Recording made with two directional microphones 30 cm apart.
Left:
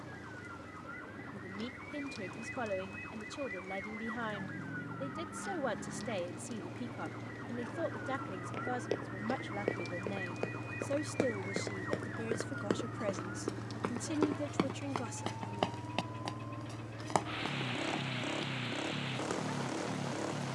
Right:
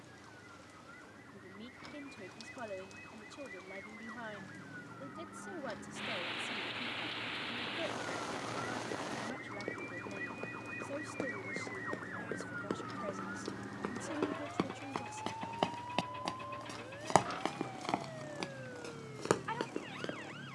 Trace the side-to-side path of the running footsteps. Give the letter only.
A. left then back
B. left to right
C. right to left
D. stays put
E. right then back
B.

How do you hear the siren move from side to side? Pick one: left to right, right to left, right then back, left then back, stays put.
left to right.